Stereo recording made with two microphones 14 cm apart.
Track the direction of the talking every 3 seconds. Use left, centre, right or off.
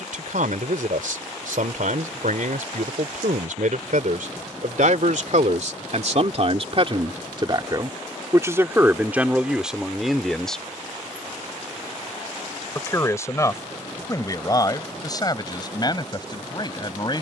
right, right, right, centre, left, left.